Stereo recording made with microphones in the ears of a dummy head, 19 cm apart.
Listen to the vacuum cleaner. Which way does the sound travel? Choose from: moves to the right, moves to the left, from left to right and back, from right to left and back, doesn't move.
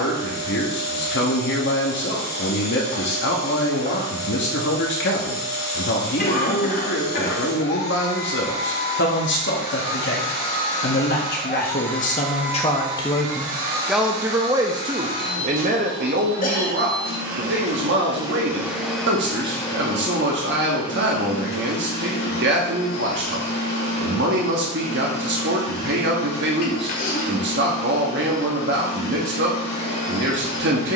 from left to right and back.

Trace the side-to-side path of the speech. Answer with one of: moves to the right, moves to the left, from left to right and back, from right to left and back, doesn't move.
moves to the right.